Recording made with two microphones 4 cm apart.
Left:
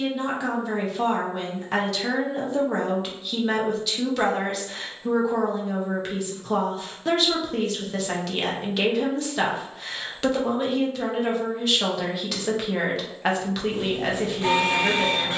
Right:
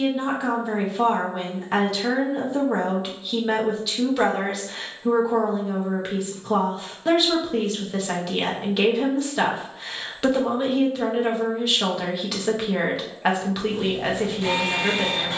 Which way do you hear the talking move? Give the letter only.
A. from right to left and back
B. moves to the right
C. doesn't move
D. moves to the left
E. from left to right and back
C.